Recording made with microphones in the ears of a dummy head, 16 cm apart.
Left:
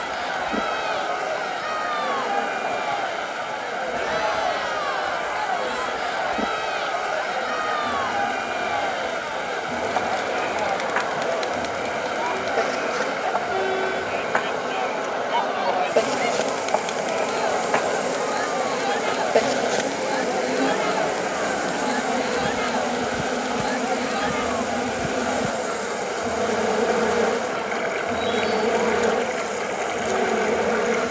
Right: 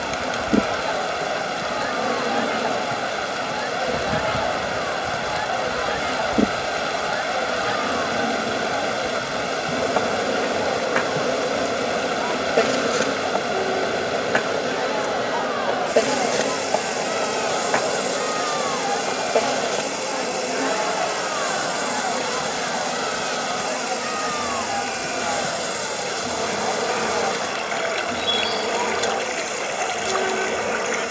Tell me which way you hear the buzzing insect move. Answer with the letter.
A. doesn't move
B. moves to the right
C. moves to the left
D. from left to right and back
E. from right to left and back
C.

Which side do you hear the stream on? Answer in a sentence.
You can hear the stream on the right.